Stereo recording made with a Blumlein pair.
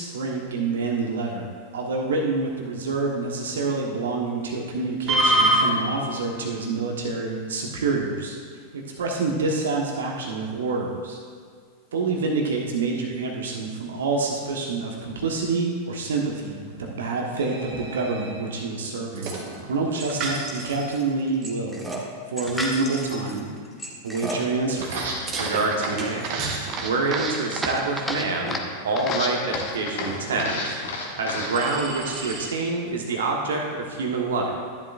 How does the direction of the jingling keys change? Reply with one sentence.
In this clip you hear the jingling keys go left and come back.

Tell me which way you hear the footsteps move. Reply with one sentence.
You can hear the footsteps move from right to left.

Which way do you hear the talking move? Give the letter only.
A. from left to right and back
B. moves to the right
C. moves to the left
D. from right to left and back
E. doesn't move
E.